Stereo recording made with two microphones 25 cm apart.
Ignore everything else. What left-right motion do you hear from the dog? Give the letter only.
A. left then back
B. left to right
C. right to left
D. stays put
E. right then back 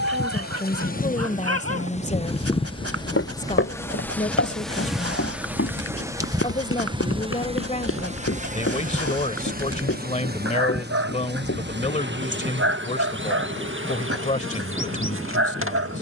D.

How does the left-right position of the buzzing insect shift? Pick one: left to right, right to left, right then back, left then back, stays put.
left to right.